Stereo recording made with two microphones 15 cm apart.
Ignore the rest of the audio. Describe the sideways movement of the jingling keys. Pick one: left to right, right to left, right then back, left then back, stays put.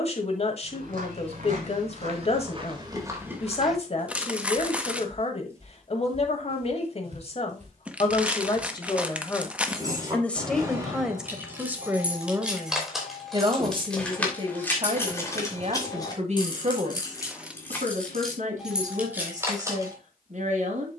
left then back.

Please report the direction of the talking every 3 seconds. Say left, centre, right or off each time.
left, left, left, centre, right, right, right.